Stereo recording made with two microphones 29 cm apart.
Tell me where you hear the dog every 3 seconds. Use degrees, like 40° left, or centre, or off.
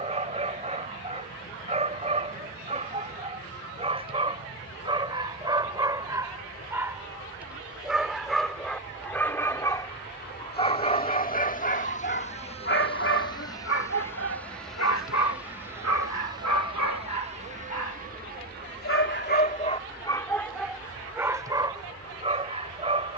20° right, 20° right, centre, 20° left, 50° left, 80° left, 20° left, 20° right.